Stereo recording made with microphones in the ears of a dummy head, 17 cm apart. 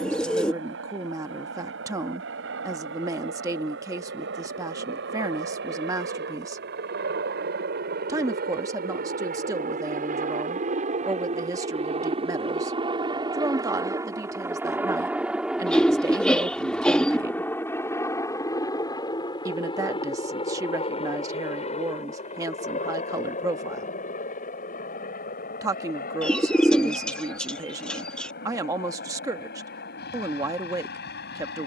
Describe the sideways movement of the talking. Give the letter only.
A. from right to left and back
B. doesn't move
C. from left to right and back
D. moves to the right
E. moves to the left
B.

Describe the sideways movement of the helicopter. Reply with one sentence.
You can hear the helicopter move to the left.